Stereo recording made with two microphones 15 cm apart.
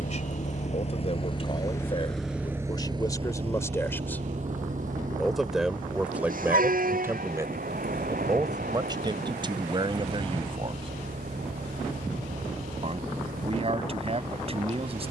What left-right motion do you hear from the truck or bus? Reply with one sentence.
In this clip you hear the truck or bus travel towards the right.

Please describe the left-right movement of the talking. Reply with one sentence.
In this clip you hear the talking move from left to right.